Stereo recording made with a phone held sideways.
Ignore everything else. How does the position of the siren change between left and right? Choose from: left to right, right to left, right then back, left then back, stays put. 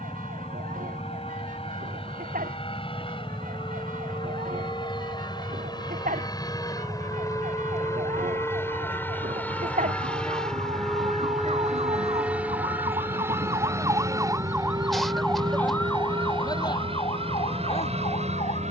right to left.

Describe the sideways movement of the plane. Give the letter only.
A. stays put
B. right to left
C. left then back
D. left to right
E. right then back
D.